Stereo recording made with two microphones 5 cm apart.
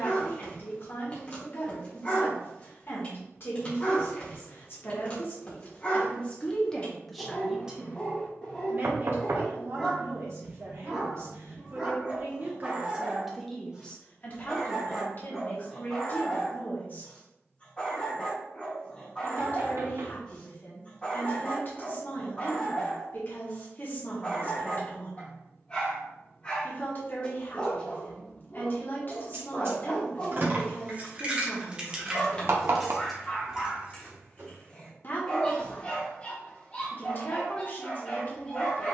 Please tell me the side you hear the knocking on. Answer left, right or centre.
right.